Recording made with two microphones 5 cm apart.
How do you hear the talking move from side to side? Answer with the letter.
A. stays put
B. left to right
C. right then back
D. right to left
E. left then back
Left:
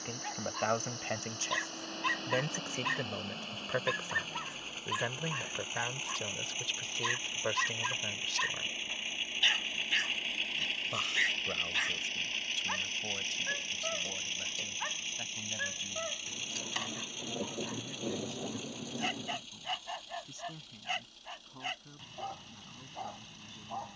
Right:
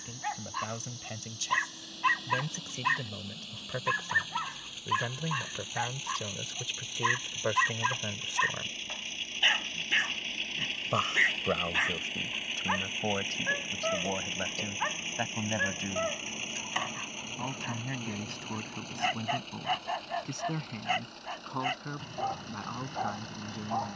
B.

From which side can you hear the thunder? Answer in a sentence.
In this clip you hear the thunder on the left.